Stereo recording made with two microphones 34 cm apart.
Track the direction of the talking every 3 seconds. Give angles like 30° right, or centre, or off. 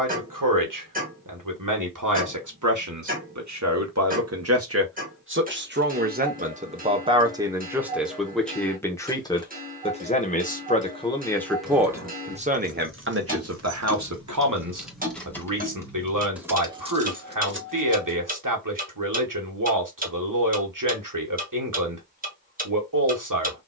60° right, 40° right, 10° right, 10° left, 40° right, 60° right, 60° right, 60° right.